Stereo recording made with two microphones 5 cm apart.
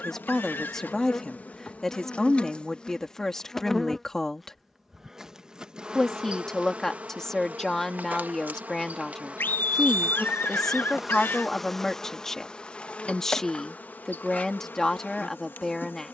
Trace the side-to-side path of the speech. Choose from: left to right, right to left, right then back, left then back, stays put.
stays put.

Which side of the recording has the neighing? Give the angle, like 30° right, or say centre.
50° left.